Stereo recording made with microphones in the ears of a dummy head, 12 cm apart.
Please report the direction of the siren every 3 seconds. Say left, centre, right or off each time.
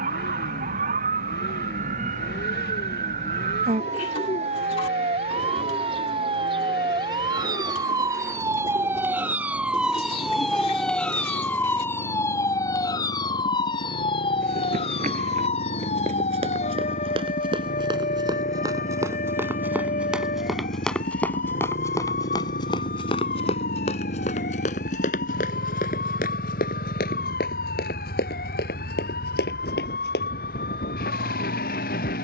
right, right, right, centre, left, left, left, left, left, left, left.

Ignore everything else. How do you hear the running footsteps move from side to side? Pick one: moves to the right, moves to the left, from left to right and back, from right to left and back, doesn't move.
moves to the left.